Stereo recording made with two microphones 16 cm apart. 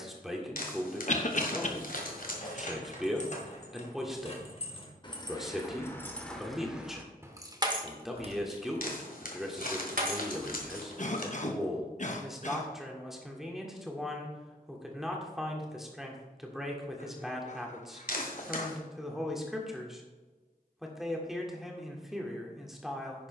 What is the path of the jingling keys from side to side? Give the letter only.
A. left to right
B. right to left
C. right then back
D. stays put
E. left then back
A.